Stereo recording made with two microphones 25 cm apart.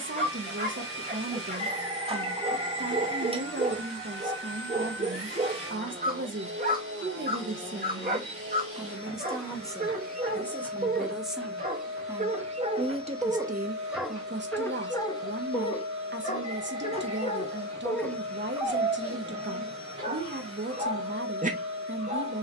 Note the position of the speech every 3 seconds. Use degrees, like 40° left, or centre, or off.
50° right, 50° right, 40° right, centre, 30° right, 50° right, 50° right, 50° right.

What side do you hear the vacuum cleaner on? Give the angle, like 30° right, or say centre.
60° right.